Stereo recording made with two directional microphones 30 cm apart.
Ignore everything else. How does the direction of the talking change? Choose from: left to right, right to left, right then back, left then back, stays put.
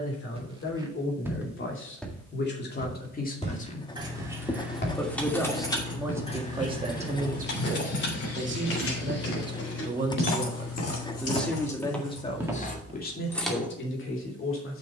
right then back.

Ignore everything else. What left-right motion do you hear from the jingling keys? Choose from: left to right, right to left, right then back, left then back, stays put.
left then back.